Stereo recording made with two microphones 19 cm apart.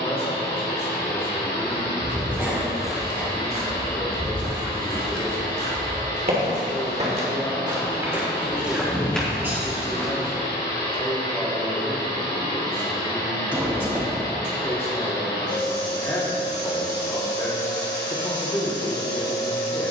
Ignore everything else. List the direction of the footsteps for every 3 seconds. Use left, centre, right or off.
centre, right, right, centre, off, off, off.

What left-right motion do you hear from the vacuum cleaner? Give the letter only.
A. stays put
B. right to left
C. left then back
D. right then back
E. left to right
A.